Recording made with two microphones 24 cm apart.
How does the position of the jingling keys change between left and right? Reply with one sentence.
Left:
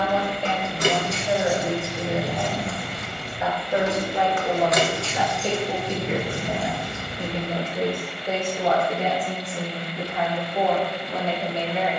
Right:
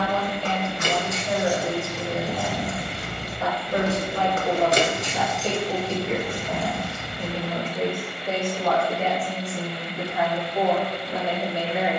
You can hear the jingling keys move from left to right and back again.